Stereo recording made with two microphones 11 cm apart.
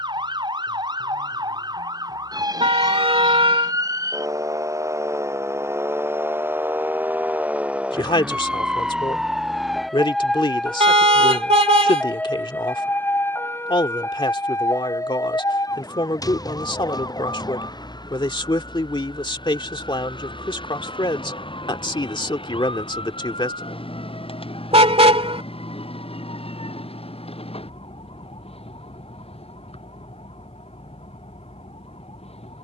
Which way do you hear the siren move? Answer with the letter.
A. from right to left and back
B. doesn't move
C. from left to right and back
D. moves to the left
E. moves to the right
D.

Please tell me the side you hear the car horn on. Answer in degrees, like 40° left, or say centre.
70° right.